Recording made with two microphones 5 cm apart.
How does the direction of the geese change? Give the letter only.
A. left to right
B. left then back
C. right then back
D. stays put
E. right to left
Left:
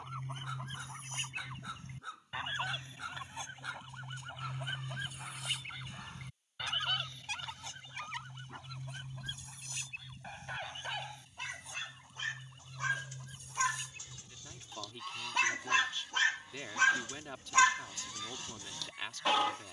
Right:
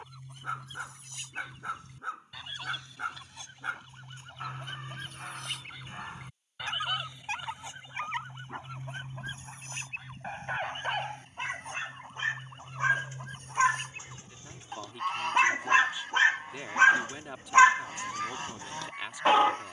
A.